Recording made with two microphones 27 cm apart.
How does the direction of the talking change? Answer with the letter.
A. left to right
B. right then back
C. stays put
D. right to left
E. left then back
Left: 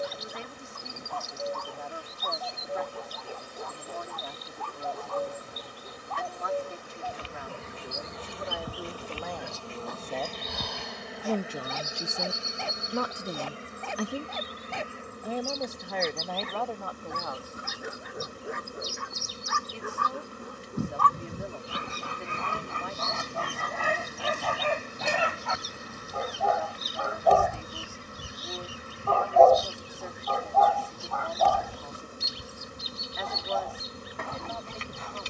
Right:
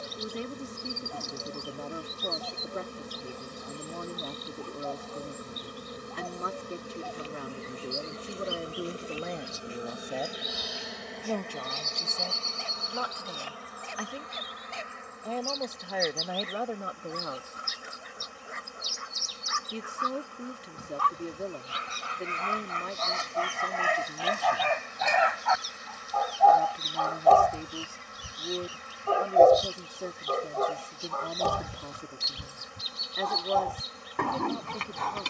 E.